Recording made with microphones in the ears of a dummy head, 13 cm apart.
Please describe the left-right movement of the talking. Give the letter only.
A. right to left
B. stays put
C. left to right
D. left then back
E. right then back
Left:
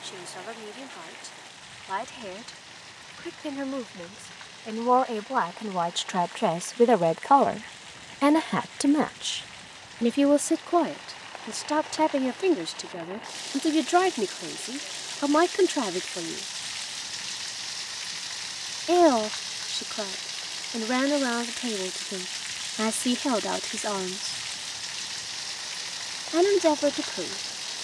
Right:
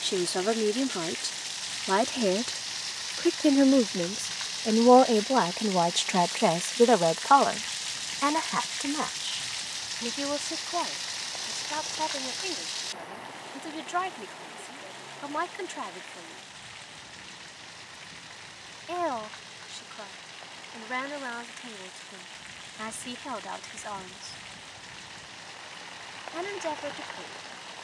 A.